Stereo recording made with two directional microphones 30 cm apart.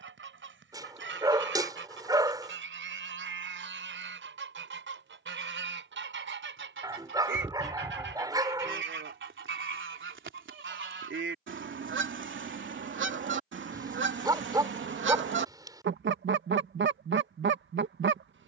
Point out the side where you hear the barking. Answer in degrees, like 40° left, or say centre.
10° right.